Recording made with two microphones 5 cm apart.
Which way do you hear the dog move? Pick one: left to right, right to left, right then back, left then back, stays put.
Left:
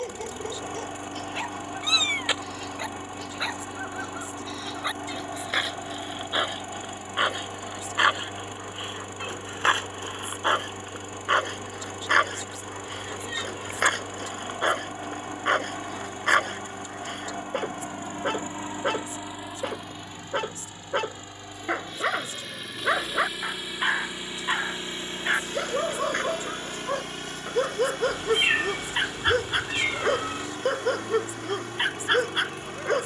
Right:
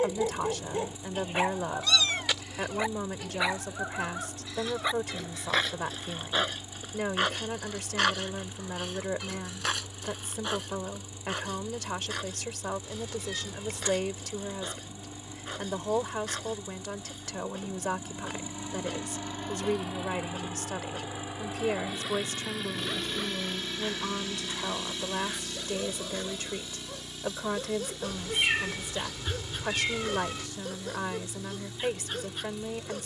right to left.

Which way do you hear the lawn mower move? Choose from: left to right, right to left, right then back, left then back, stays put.
right then back.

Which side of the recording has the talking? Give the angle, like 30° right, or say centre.
70° right.